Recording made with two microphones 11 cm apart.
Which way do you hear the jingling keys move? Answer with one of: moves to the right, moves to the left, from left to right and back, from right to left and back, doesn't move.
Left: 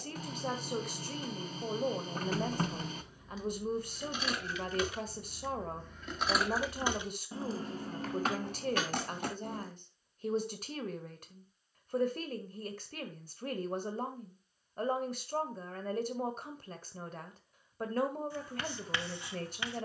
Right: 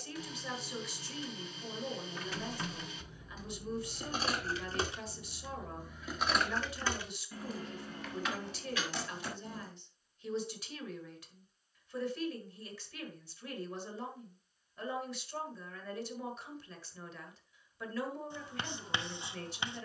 moves to the left.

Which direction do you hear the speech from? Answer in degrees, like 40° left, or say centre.
50° left.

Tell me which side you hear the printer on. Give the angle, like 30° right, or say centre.
50° left.